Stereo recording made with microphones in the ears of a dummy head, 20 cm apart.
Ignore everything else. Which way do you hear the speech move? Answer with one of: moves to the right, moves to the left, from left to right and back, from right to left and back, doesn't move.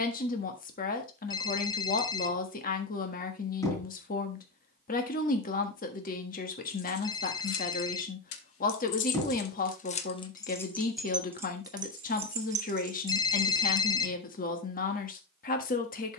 doesn't move.